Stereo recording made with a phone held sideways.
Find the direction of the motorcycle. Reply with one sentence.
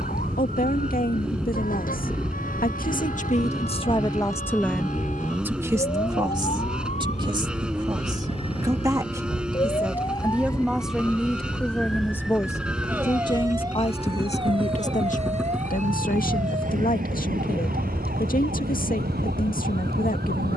In this clip you hear the motorcycle in the centre.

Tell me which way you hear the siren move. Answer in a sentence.
In this clip you hear the siren move to the right.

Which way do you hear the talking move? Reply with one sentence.
You can hear the talking move from left to right and back again.